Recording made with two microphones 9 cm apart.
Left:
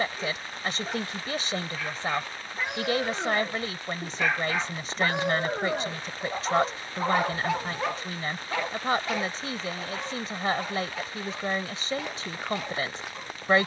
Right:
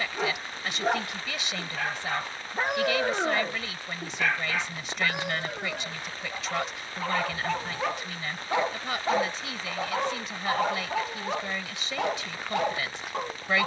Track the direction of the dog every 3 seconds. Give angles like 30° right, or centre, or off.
60° right, 10° left, 10° left, 60° right, 60° right.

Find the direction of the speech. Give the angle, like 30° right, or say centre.
40° left.